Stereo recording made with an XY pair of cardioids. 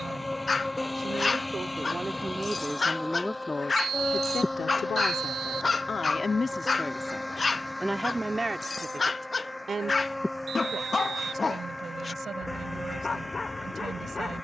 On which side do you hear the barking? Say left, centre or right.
left.